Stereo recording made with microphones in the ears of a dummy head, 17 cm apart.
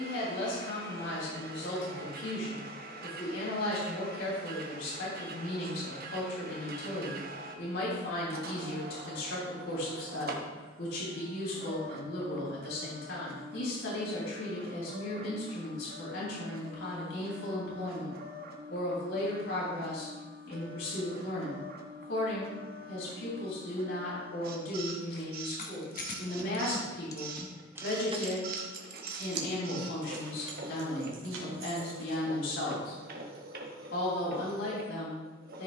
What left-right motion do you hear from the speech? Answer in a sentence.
You can hear the speech stay put.